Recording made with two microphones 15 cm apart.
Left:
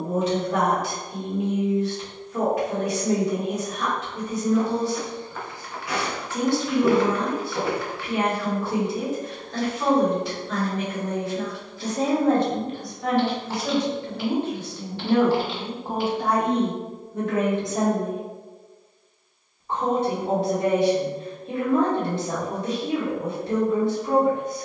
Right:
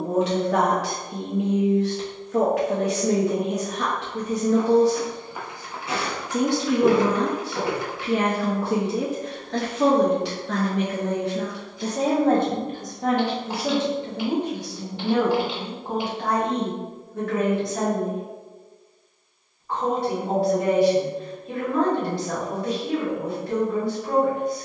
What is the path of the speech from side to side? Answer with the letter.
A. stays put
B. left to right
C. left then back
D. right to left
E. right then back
D.